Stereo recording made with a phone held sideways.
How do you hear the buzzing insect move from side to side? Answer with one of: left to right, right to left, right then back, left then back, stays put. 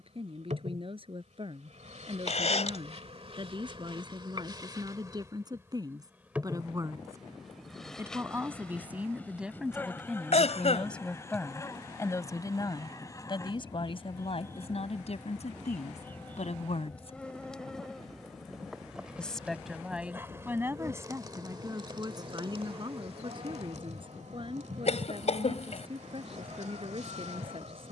left then back.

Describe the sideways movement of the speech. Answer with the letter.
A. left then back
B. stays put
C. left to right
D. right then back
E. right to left
A.